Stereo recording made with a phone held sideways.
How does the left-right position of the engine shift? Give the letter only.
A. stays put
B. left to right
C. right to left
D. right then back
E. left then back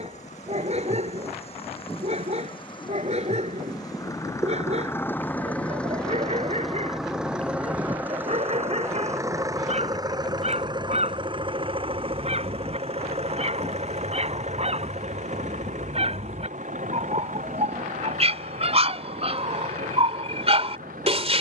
B.